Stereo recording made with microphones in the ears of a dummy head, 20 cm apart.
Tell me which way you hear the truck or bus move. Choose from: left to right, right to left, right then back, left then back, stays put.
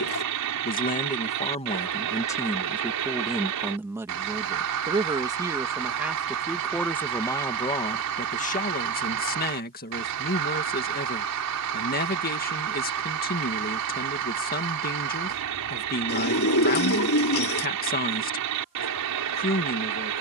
stays put.